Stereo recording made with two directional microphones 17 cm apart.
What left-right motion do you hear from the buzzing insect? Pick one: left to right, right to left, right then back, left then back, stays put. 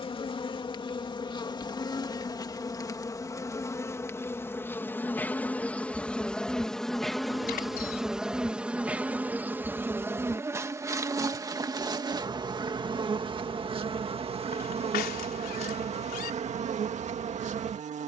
left to right.